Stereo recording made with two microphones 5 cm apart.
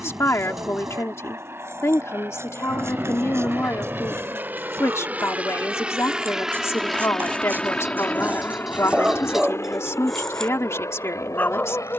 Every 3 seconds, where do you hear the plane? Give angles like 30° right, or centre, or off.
60° right, 40° right, 10° left, 60° left.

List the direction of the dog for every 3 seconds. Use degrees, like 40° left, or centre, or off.
60° right, 60° right, 40° right, 10° left.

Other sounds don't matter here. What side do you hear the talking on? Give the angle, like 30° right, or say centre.
60° left.